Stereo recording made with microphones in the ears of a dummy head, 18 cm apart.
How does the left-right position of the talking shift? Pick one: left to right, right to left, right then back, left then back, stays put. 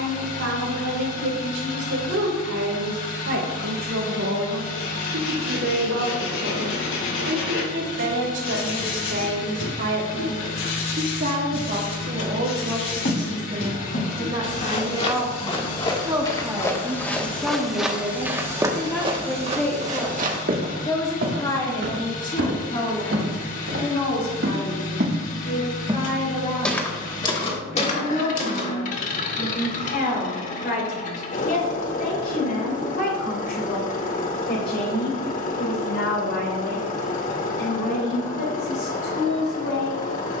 right to left.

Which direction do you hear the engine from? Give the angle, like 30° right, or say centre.
40° left.